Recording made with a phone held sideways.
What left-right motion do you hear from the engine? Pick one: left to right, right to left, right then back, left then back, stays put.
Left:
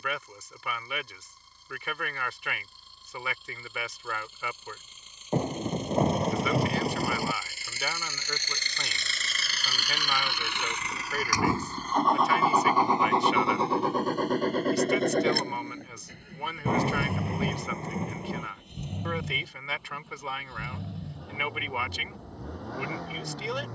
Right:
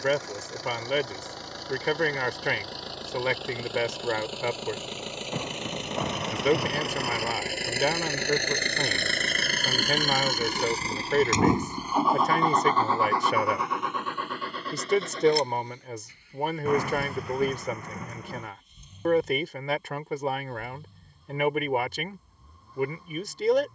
right to left.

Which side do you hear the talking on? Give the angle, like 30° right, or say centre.
50° right.